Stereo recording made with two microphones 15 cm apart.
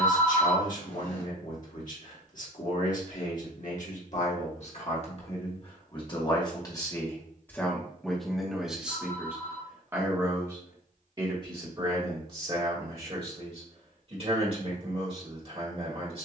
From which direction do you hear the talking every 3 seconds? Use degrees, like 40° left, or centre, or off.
60° left, 50° left, 10° left, 30° right, 40° right, 40° right.